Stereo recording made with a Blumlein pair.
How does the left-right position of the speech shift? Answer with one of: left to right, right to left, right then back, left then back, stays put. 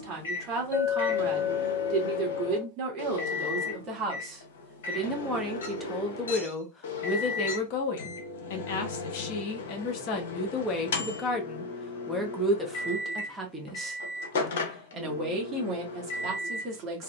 left then back.